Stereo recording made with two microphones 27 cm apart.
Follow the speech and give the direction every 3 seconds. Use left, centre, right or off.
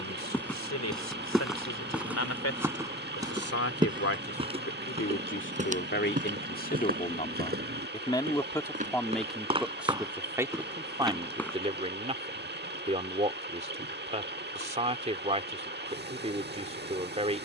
left, left, left, centre, right, right.